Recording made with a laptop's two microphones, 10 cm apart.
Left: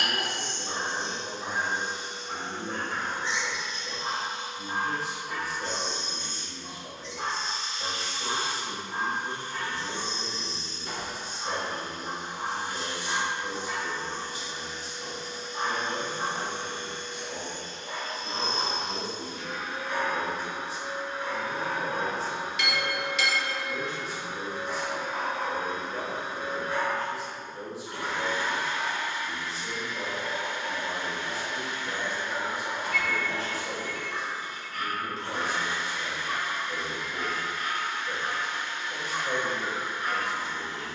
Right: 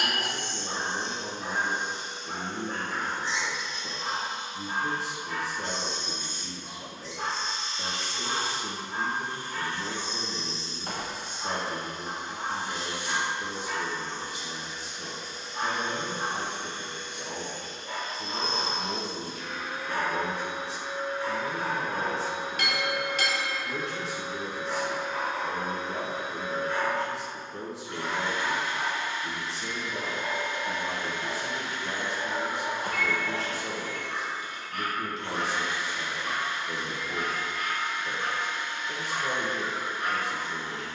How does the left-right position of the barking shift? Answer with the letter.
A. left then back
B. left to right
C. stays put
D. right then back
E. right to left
B.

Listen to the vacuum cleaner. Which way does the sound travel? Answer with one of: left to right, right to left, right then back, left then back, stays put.
right to left.